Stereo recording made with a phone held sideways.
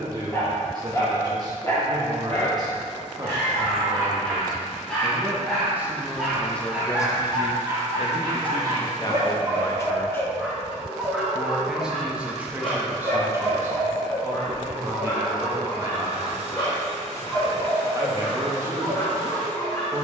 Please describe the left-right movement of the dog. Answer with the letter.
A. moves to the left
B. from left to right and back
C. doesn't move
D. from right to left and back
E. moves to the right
B.